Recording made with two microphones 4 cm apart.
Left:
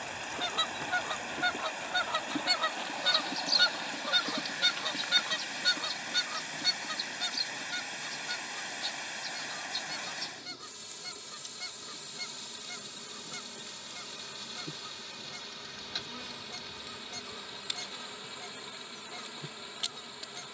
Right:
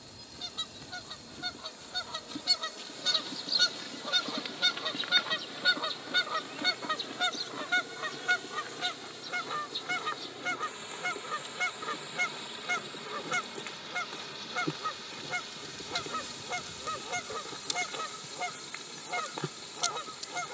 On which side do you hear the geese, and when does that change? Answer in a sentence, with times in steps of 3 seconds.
You can hear the geese on the left from 0 s, in the centre from 3 s and on the right from 6 s.